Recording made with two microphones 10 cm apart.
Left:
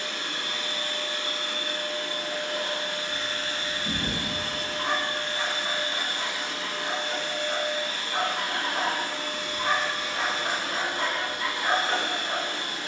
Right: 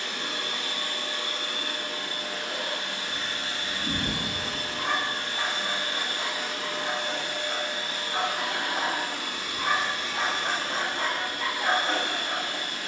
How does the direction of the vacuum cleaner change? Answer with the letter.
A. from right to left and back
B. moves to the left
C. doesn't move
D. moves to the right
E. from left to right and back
B.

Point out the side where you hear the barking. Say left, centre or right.
right.